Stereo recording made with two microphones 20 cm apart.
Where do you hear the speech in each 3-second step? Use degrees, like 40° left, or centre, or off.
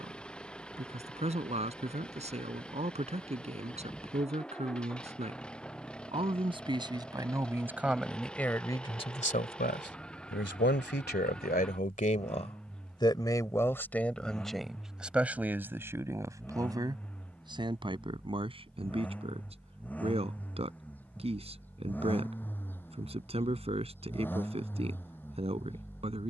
30° right, 30° right, 10° right, 50° left, 10° left, 10° right, 30° right, 30° right, 30° right.